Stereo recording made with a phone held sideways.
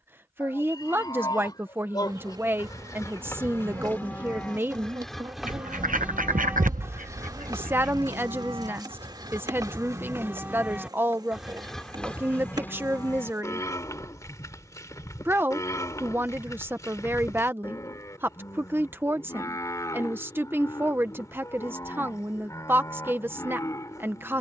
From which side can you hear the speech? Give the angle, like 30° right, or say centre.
20° right.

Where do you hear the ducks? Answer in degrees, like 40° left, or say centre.
70° right.